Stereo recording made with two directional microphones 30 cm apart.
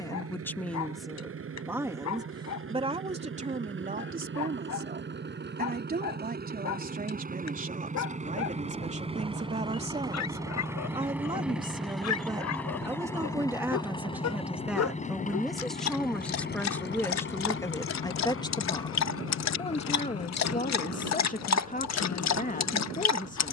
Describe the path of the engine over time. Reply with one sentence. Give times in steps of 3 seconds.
You can hear the engine on the right from 0 s, in the centre from 9 s and on the left from 15 s.